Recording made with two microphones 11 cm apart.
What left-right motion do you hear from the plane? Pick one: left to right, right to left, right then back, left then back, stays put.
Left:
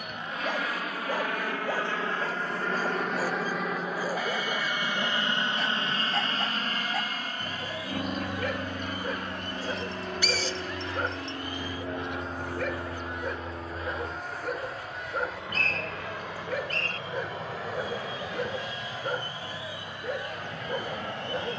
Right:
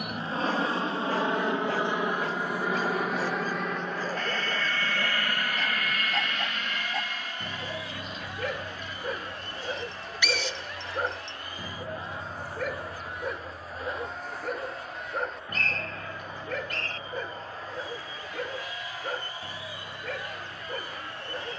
right to left.